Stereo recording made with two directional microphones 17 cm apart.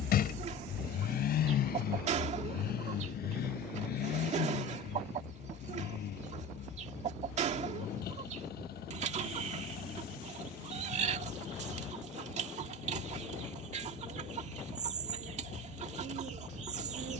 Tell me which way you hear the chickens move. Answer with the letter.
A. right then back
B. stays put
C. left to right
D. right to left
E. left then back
B.